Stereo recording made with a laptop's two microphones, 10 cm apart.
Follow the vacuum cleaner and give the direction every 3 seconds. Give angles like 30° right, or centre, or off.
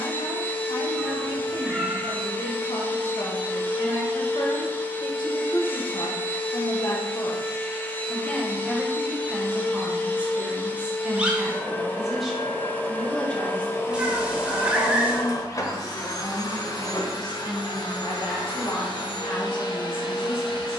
20° left, 20° left, 20° left, 20° left, 30° left, 50° left, 60° left.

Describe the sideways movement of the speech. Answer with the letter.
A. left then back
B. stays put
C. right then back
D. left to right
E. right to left
C.